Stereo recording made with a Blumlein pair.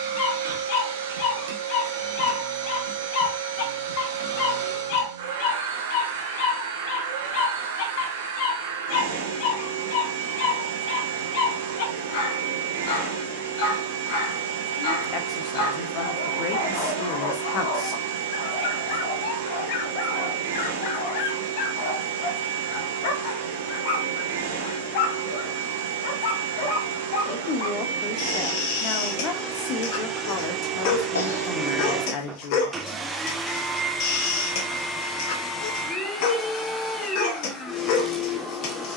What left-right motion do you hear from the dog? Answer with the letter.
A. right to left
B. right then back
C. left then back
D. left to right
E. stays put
E.